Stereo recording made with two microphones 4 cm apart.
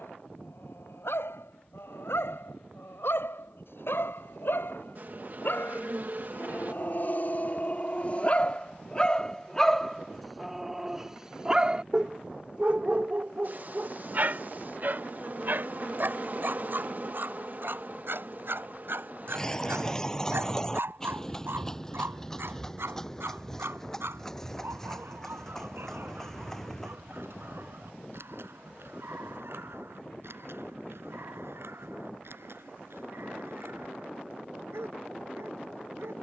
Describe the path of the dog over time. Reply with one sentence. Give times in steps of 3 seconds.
In this clip you hear the dog on the left from 0 s, in the centre from 9 s and on the right from 12 s.